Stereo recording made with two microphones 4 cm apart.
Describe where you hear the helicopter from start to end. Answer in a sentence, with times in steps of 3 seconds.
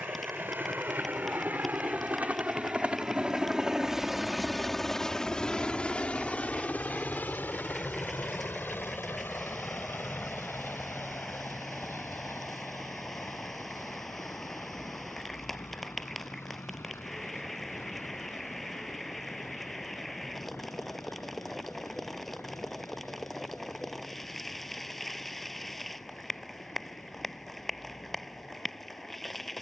In this clip you hear the helicopter on the right from 0 s, in the centre from 3 s and on the left from 6 s.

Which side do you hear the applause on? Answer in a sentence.
In this clip you hear the applause in the centre.